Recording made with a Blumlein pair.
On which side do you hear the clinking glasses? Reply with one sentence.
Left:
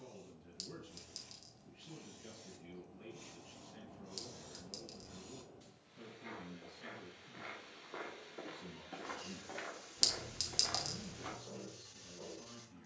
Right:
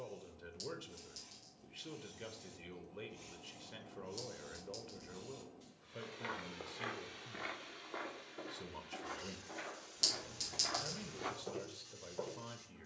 You can hear the clinking glasses on the left.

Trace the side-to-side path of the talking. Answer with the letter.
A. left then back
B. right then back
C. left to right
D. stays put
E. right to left
D.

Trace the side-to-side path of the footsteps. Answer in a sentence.
You can hear the footsteps move from right to left and back again.